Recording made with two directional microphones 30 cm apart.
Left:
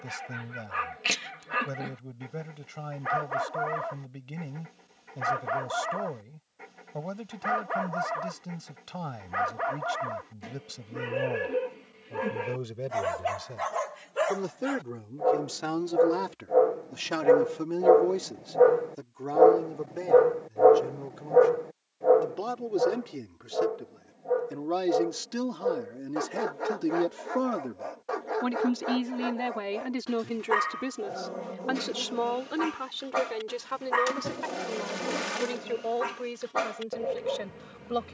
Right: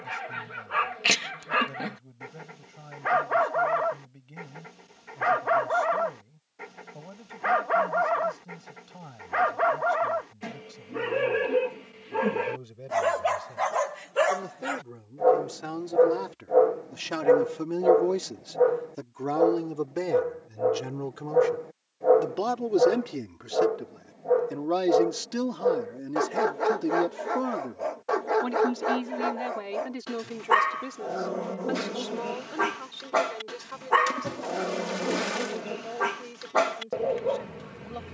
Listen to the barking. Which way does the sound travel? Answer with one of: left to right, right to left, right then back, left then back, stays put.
left then back.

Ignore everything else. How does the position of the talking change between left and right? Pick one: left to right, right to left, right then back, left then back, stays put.
right then back.